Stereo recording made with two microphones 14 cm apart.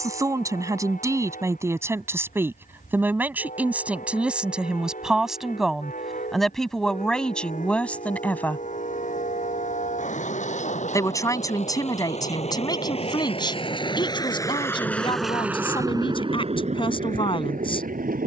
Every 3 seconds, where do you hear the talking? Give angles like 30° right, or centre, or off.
20° right, 10° right, 10° left, 20° left, 30° left, 40° left.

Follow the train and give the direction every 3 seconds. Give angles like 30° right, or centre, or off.
70° left, 70° left, 60° left, 60° left, 40° left, 40° right.